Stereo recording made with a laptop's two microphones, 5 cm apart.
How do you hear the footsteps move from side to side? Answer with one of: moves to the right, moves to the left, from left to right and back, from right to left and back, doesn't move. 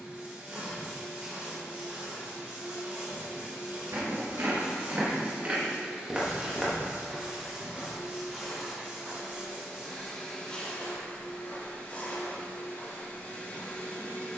moves to the left.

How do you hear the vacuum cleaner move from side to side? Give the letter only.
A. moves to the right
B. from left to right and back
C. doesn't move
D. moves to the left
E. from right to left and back
D.